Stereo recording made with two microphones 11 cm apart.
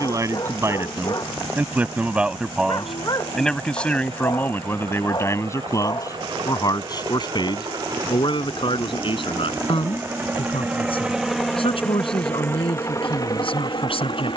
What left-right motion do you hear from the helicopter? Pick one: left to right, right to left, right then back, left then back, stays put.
right to left.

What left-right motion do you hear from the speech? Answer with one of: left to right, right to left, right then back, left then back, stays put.
right to left.